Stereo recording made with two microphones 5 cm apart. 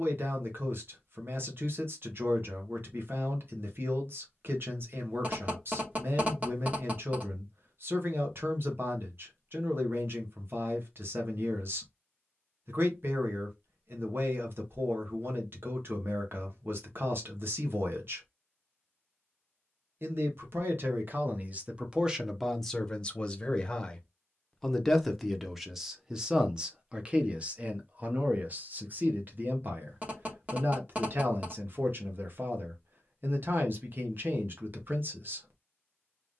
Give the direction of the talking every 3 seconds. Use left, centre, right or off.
right, right, right, right, right, right, right, centre, centre, right, right, right.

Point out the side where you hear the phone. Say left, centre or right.
right.